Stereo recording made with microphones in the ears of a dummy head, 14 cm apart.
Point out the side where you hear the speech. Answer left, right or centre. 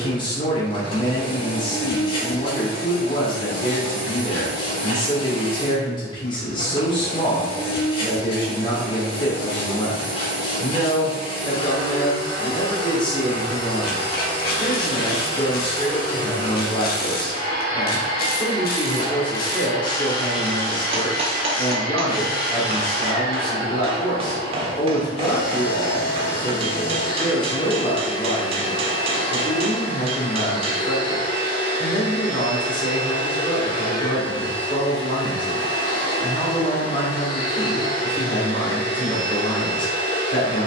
left.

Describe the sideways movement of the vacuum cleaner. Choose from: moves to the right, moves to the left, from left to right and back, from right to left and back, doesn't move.
doesn't move.